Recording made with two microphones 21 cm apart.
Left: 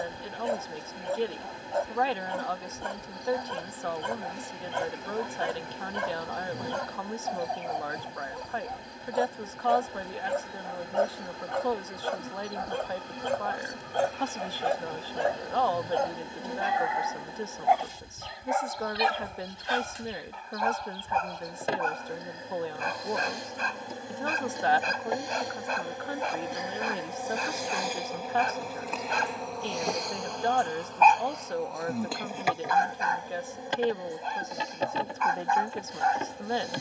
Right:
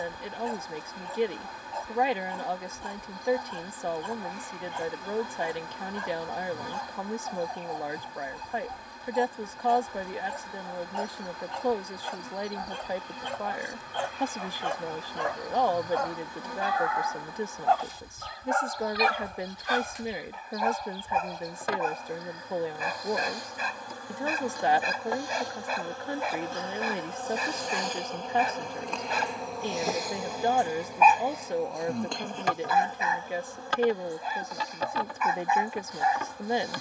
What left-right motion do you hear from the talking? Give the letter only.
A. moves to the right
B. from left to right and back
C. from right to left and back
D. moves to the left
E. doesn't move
E.